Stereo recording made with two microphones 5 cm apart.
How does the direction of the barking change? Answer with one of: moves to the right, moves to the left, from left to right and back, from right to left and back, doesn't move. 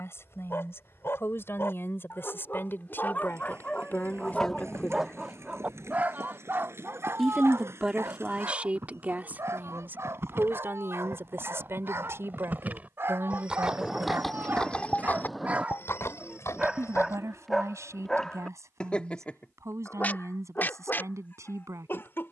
from left to right and back.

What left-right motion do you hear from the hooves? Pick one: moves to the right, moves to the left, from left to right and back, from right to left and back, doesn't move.
moves to the left.